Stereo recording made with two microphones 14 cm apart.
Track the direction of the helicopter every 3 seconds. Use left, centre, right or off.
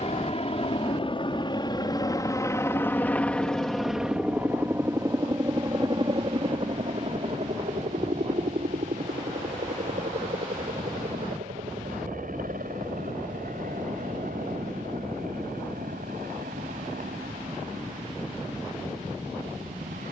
left, centre, right, right, right, right, right.